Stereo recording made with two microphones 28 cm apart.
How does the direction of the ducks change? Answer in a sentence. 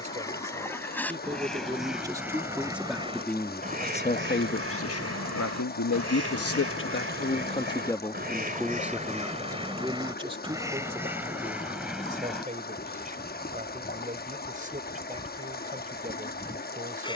In this clip you hear the ducks move from left to right and back again.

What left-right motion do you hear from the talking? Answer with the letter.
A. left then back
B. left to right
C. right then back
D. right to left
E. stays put
A.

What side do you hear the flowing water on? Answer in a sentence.
You can hear the flowing water on the left.